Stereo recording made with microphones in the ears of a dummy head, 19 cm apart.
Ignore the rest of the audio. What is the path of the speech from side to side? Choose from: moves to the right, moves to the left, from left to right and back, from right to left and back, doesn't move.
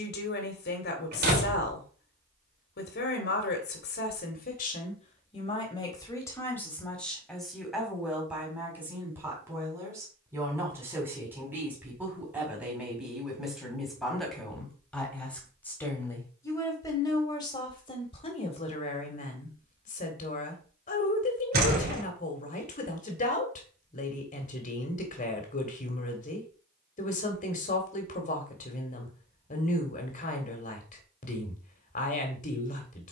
from left to right and back.